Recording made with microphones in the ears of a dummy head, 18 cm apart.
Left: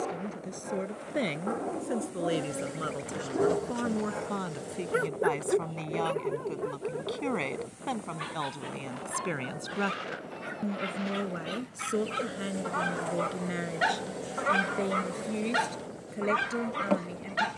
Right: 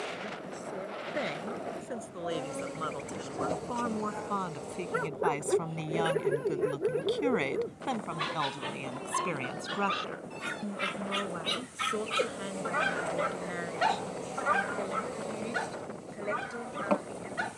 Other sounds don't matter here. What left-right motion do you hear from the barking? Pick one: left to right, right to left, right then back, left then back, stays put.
right then back.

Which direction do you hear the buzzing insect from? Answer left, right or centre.
centre.